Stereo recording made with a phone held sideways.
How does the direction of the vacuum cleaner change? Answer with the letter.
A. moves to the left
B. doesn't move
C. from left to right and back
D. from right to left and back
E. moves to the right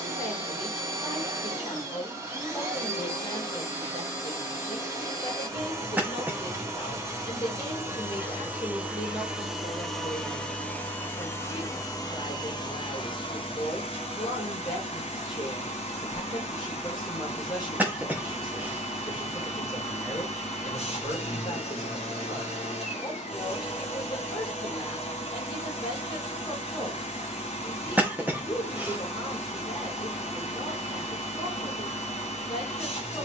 A.